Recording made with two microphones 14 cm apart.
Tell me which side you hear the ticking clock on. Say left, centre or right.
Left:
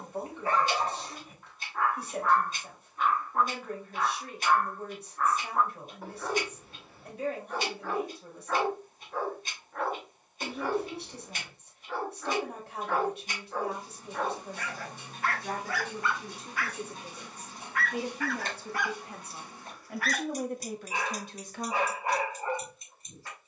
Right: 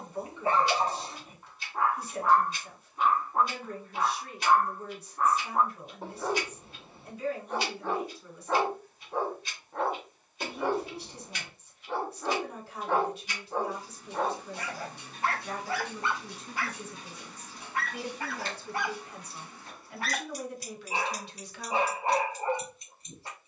left.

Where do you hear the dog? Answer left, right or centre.
right.